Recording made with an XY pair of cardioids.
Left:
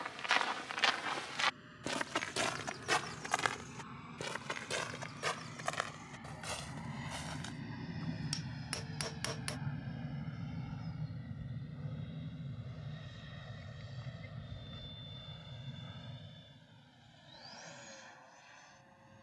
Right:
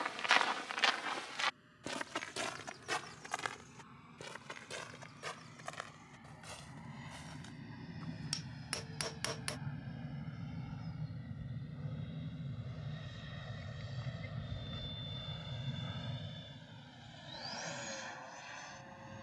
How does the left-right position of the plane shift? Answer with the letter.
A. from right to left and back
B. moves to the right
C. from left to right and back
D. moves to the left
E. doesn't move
B.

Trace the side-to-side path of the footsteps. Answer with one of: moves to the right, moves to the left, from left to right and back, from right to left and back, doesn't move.
moves to the left.